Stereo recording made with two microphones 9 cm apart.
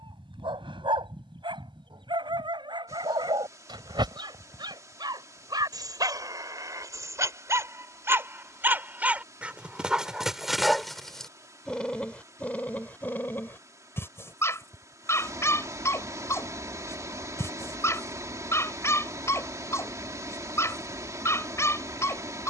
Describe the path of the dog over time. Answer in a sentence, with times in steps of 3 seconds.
In this clip you hear the dog on the right from 0 s, in the centre from 9 s and on the left from 12 s.